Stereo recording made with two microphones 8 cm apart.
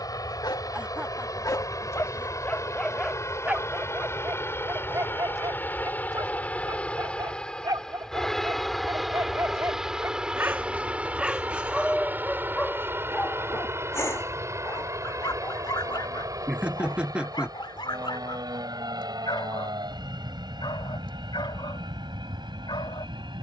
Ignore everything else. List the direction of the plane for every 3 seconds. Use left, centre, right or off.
left, left, centre, centre, right, right, right, right.